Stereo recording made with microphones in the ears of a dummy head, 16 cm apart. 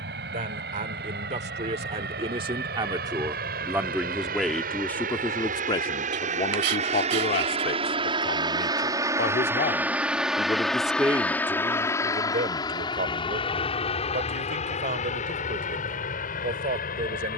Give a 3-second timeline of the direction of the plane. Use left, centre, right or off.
right, right, right, centre, left, left.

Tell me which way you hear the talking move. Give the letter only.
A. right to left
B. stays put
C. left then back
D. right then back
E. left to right
C.